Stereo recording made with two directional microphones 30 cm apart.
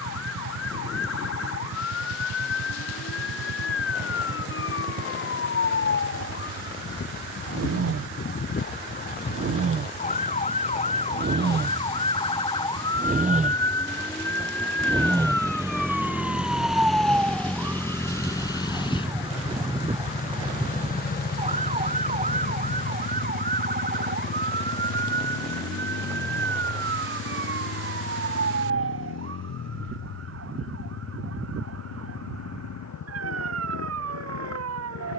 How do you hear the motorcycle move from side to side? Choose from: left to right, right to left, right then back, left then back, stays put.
right to left.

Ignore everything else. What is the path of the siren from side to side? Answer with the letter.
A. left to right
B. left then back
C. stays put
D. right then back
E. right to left
A.